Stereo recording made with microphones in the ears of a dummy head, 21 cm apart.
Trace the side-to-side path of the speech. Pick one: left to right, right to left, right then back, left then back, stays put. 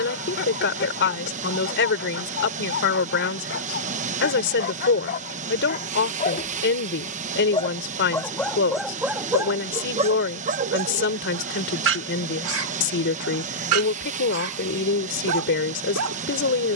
stays put.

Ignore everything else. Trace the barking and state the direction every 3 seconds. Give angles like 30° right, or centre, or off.
50° left, 50° left, 20° left, 30° right, 70° right, 70° right.